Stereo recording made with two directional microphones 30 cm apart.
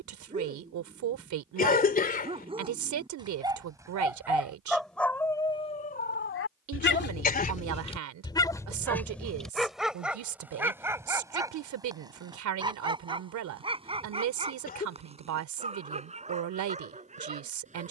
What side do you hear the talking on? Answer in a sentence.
In this clip you hear the talking on the right.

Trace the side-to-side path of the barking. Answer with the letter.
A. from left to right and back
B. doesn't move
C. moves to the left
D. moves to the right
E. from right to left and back
E.